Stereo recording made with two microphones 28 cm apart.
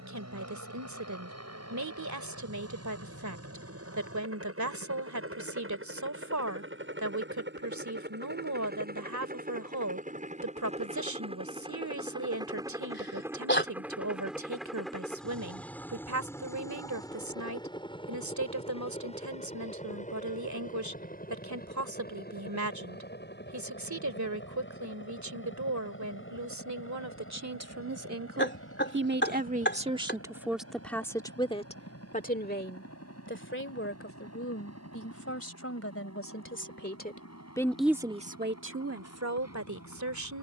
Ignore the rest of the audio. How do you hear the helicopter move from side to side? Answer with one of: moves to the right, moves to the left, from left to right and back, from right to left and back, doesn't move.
moves to the left.